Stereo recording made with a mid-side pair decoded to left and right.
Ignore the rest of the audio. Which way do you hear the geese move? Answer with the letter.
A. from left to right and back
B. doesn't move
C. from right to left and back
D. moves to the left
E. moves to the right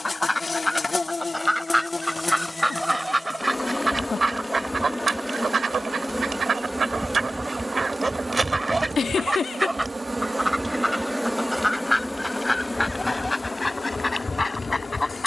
A.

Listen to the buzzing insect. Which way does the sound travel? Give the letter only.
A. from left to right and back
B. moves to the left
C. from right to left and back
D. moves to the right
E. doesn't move
A.